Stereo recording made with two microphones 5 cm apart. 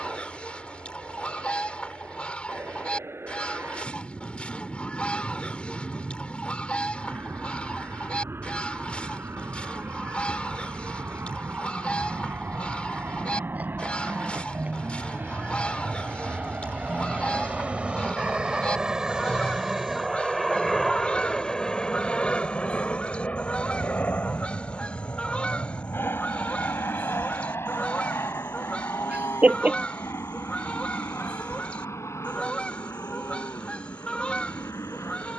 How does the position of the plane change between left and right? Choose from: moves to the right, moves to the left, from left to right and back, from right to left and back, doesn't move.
moves to the left.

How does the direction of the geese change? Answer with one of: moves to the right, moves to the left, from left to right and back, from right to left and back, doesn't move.
doesn't move.